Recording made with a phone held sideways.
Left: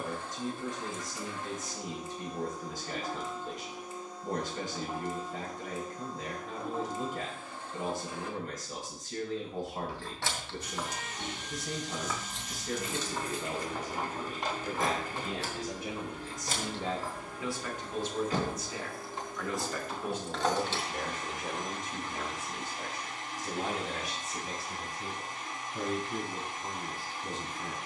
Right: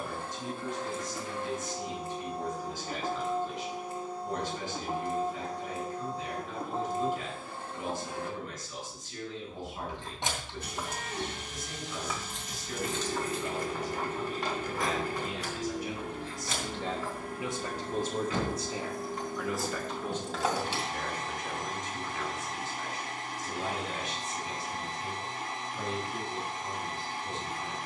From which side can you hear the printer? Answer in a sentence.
In this clip you hear the printer on the right.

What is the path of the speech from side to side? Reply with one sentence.
You can hear the speech move from left to right and back again.